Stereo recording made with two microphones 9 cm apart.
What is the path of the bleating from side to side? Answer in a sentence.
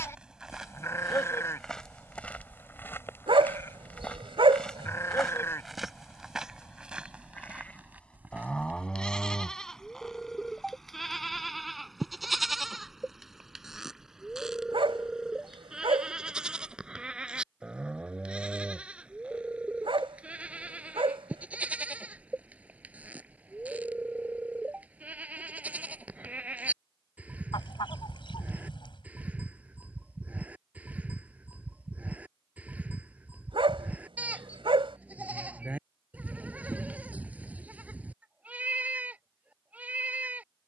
You can hear the bleating travel towards the right.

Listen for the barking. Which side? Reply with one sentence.
You can hear the barking on the right.